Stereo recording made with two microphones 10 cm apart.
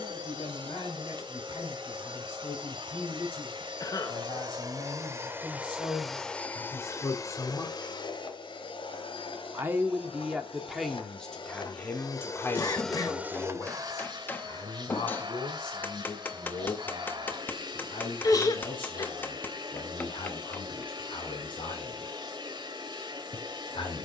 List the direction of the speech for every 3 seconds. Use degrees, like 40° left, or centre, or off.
60° left, 60° left, 30° left, centre, 30° left, 50° left, 60° left, 60° left.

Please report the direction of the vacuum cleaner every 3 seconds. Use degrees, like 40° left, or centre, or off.
50° right, 40° right, 40° left, 60° left, 20° right, 50° right, 50° right, 50° right.